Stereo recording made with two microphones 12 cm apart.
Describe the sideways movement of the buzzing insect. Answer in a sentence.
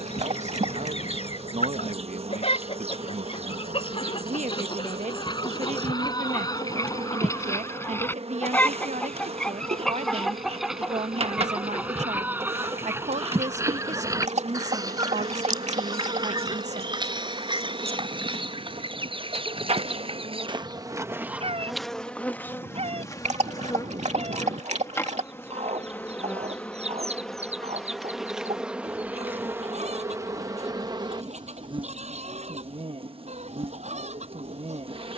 In this clip you hear the buzzing insect move from right to left and back again.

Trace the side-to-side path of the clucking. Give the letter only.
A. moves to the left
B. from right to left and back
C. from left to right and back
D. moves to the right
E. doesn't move
D.